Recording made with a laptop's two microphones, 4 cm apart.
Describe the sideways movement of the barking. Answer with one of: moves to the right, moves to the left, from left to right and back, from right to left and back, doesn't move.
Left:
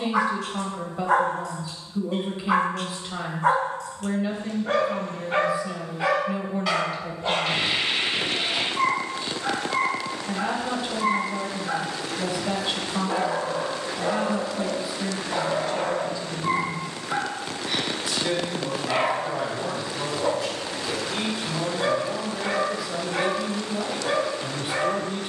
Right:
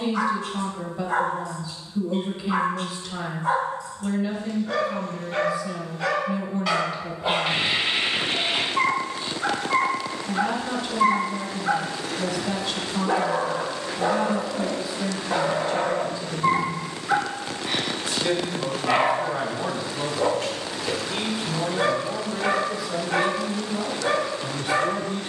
moves to the right.